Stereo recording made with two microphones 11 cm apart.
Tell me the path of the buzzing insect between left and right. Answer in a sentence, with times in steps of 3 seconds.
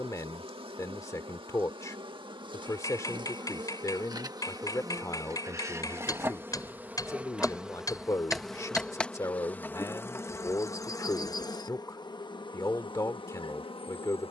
You can hear the buzzing insect on the right from 0 s, in the centre from 6 s and on the left from 9 s.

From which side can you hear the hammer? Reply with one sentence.
In this clip you hear the hammer on the left.